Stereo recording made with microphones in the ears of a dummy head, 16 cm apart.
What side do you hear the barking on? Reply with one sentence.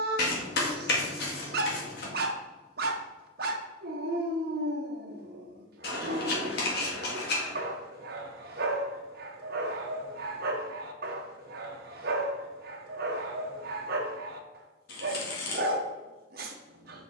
You can hear the barking on the right.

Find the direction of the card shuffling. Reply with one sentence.
In this clip you hear the card shuffling on the left.